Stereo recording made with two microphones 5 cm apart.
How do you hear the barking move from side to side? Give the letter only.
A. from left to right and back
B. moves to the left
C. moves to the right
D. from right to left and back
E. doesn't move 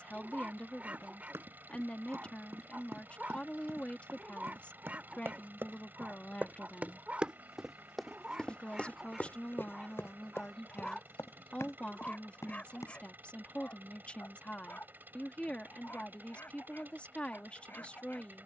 B.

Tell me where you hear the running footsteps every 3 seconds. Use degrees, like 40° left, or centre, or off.
70° right, 60° right, 10° right, 60° left, 80° left, off.